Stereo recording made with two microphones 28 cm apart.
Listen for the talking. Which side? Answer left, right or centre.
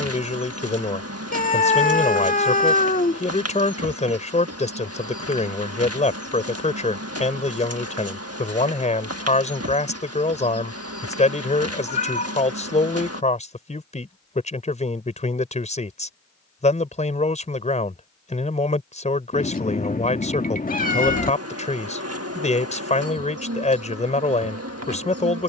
left.